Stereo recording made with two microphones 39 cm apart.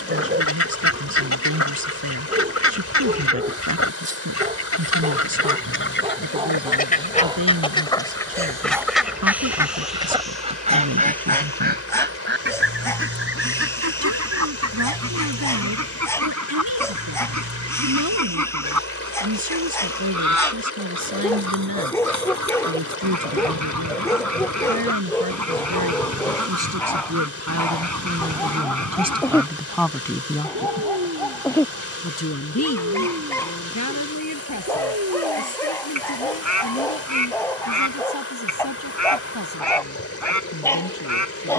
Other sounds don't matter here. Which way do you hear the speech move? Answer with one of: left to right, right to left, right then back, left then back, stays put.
right to left.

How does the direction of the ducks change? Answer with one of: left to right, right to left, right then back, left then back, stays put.
left to right.